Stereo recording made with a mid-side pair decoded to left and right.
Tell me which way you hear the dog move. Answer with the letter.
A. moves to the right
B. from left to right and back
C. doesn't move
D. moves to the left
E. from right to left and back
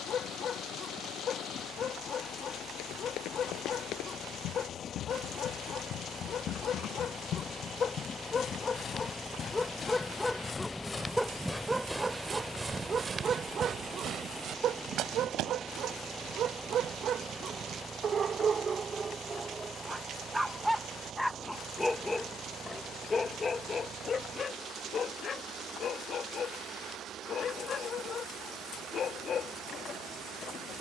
B.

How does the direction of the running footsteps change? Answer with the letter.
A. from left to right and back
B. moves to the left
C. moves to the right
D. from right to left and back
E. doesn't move
C.